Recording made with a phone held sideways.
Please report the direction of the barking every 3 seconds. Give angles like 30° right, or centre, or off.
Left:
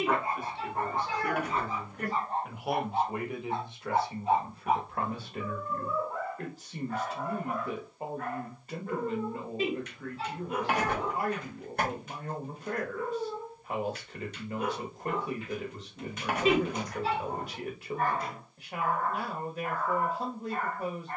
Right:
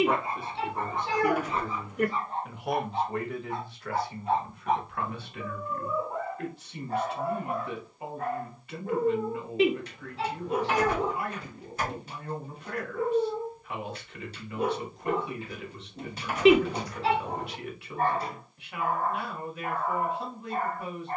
50° left, centre, 30° right, 30° right, 30° right, 30° right, 30° right.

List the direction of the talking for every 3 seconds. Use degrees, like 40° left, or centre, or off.
20° right, 30° left, 40° left, 40° left, 40° left, 40° left, 40° left.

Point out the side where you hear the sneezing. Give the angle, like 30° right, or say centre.
80° right.